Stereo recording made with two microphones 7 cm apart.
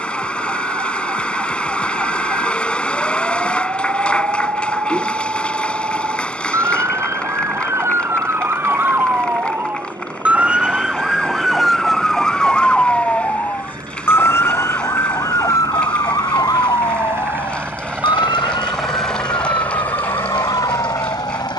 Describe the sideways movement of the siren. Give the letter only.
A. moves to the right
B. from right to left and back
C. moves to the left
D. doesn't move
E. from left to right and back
C.